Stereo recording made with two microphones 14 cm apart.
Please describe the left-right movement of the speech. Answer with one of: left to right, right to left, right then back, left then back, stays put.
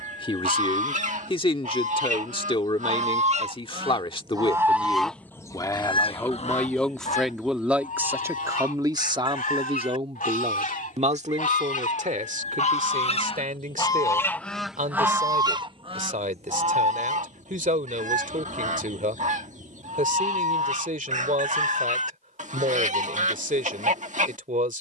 left to right.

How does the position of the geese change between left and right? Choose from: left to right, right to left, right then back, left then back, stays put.
left then back.